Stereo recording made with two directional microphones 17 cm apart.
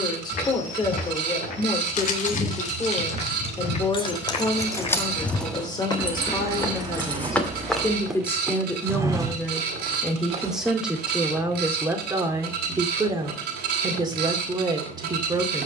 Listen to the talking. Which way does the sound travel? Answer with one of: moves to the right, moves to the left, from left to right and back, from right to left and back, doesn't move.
moves to the right.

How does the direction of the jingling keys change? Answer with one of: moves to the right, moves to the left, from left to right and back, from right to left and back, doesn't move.
moves to the right.